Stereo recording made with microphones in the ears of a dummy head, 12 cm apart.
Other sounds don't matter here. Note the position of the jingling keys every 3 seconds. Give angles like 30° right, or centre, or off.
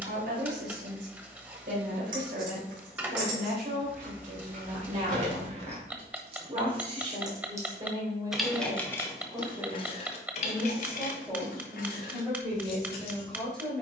60° right, 50° right, 20° right, 50° left, 70° left.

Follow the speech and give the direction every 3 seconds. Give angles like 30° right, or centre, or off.
60° right, 60° right, 30° right, 10° right, 10° left.